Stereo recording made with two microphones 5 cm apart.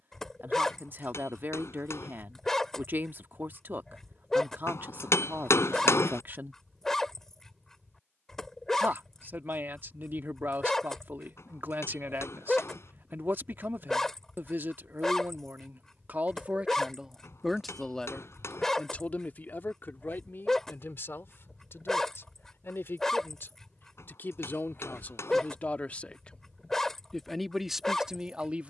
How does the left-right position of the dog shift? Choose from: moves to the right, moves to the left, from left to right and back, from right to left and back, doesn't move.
doesn't move.